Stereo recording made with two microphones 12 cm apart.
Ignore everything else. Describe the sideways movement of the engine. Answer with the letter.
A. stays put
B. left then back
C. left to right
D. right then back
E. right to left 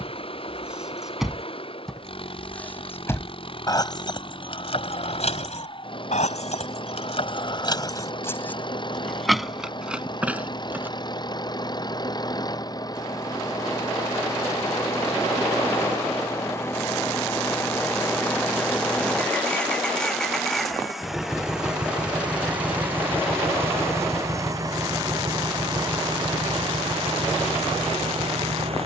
C.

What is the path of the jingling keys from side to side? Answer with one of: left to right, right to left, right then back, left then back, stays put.
left then back.